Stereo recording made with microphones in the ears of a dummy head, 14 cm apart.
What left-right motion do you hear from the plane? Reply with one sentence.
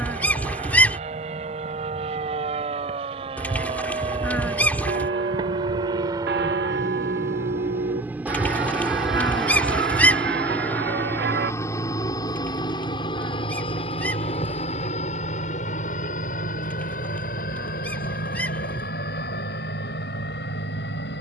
In this clip you hear the plane go from the right side to the left.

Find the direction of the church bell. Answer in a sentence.
You can hear the church bell on the right.